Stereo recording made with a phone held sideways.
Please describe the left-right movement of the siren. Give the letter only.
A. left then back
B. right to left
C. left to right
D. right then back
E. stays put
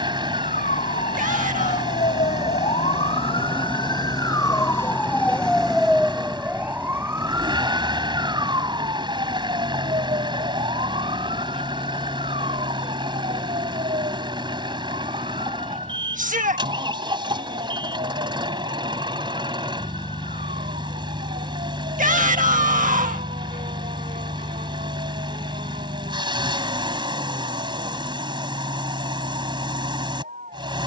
C.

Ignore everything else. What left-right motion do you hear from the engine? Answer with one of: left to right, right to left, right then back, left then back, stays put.
stays put.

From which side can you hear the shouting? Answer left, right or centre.
right.